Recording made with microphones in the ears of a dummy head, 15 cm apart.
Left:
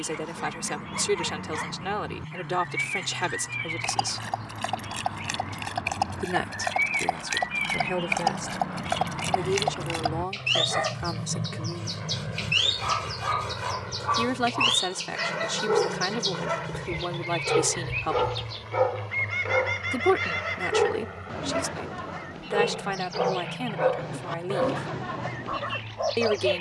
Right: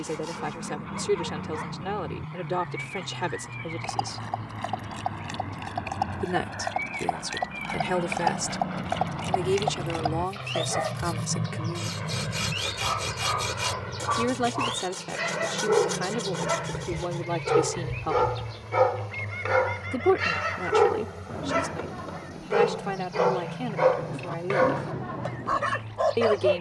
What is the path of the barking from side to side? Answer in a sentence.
In this clip you hear the barking move from left to right.